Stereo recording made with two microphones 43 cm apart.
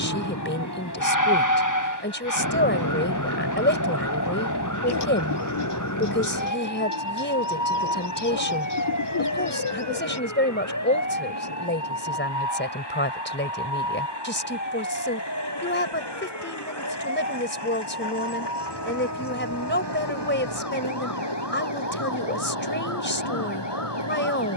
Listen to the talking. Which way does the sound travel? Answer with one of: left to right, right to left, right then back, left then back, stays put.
stays put.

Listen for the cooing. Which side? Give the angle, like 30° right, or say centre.
70° left.